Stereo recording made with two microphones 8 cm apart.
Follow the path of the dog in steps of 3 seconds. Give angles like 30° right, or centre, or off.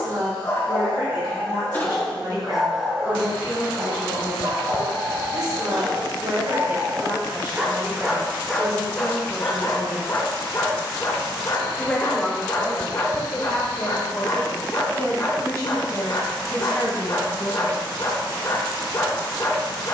30° left, 50° right, 20° right, 40° left, 50° left, 50° left, 50° left.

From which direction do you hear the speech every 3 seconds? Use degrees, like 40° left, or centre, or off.
60° right, 60° right, 40° right, 10° right, 30° left, 50° left, off.